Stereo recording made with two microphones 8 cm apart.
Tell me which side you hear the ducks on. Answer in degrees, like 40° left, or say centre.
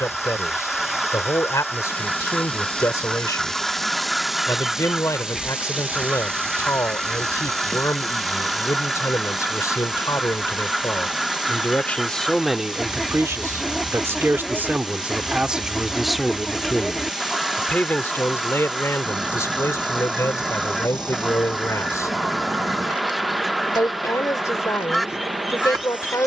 centre.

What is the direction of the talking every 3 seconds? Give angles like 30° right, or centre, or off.
40° left, 40° left, 40° left, 40° left, 20° right, centre, 30° left, 40° left, 40° left.